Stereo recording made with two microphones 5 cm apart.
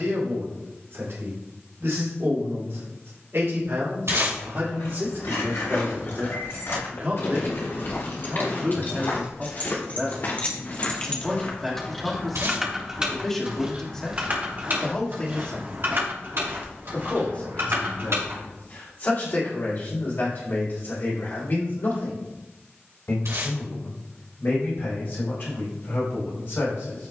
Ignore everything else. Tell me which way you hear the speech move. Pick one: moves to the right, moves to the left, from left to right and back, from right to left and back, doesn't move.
moves to the left.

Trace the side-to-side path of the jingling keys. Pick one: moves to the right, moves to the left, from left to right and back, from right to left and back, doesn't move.
moves to the right.